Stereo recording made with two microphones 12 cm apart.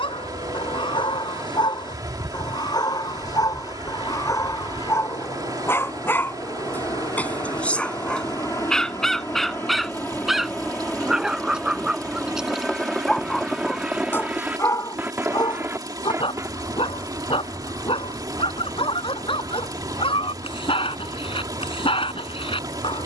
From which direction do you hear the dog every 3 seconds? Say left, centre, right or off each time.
left, left, centre, centre, centre, left, left, left.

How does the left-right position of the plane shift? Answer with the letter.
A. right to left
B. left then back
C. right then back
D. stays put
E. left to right
E.